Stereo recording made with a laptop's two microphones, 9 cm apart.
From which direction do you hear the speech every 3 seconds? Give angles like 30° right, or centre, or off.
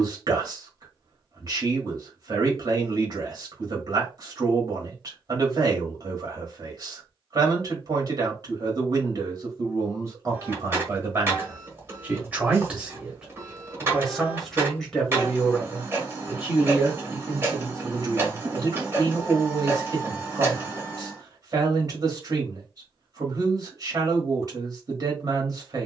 40° right, 40° right, 40° right, 30° right, 10° right, 20° right, 40° right, 40° right, 40° right.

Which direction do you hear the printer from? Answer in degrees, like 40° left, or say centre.
30° right.